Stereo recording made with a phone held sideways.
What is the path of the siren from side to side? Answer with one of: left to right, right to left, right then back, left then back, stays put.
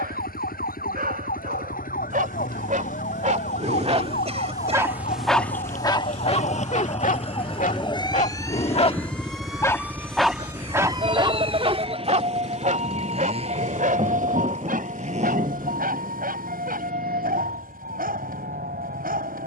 left to right.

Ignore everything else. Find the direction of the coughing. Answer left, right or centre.
right.